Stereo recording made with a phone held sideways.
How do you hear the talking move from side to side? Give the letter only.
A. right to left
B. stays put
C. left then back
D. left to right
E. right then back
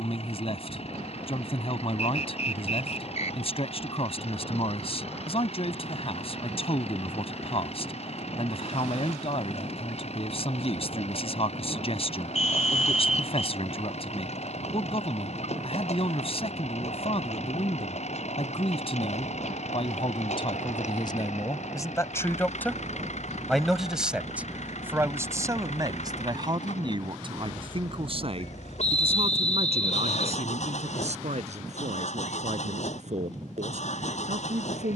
D.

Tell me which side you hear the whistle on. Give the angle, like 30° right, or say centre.
60° left.